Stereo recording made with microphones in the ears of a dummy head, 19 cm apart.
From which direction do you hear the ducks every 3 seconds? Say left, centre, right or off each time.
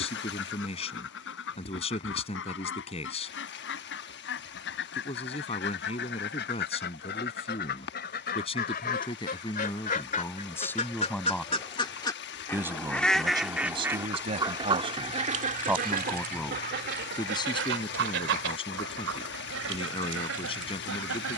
left, left, left, left, centre, right, right.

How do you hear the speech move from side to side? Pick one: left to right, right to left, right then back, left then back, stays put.
right then back.